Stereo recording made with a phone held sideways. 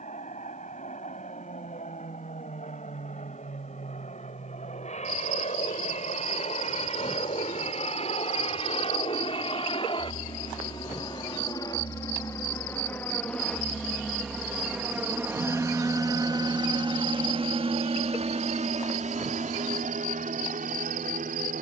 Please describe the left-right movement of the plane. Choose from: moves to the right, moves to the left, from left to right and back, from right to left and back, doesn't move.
moves to the right.